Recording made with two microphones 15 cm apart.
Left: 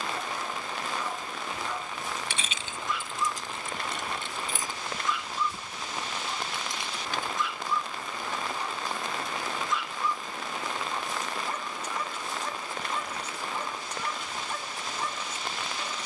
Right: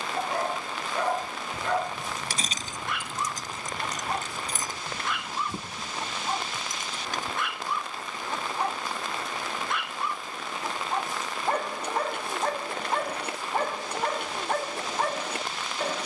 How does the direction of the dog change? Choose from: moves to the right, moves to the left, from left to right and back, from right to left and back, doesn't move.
doesn't move.